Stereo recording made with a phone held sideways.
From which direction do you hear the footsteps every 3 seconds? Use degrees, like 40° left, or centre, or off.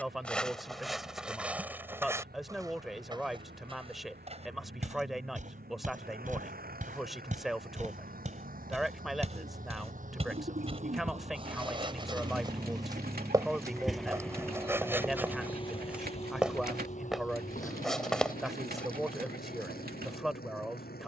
10° right, 40° right, 50° right, 40° right, 20° right, 10° right, 10° left.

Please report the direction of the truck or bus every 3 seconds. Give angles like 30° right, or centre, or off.
80° right, 70° right, 70° right, 50° right, 10° right, 40° left, 60° left.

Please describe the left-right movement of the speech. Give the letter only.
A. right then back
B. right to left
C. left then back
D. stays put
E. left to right
D.